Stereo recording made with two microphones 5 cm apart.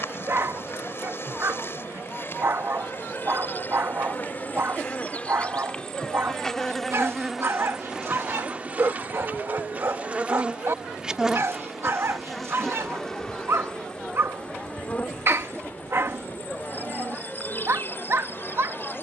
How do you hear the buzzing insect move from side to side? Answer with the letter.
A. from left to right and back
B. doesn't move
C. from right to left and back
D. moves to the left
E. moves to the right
A.